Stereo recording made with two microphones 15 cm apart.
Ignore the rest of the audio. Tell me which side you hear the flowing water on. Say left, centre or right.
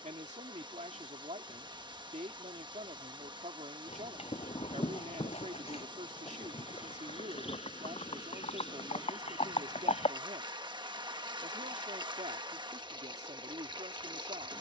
right.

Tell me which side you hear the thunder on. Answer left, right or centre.
left.